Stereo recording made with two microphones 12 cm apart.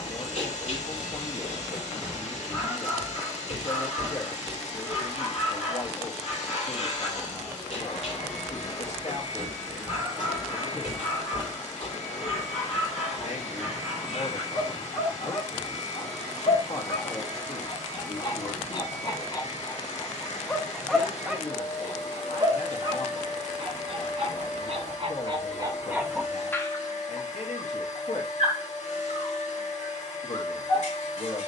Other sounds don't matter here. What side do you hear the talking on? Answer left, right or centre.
left.